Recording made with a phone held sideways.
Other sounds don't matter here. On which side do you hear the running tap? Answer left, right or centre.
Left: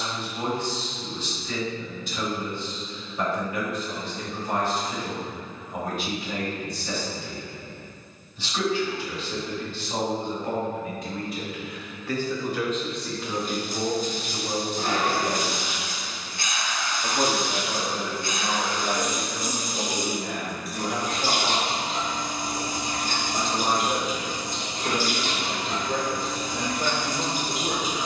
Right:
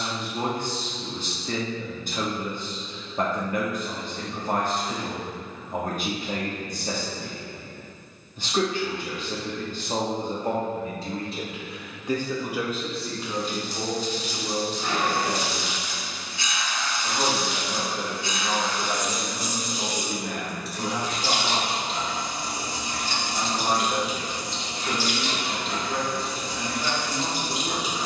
left.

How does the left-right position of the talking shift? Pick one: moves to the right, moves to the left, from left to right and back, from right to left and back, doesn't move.
moves to the left.